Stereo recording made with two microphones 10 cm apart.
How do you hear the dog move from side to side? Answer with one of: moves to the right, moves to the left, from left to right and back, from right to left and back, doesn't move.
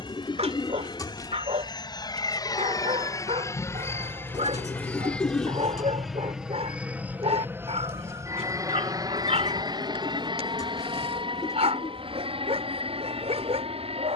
doesn't move.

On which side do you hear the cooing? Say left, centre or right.
left.